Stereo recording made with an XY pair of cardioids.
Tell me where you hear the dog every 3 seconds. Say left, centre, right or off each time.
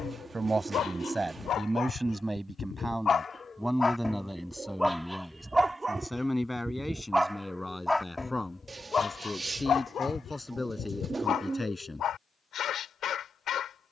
left, centre, centre, left, left.